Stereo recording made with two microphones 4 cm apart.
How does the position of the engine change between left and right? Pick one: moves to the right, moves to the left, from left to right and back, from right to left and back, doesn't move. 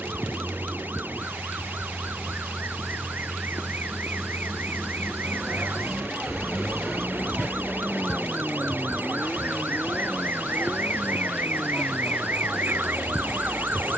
moves to the left.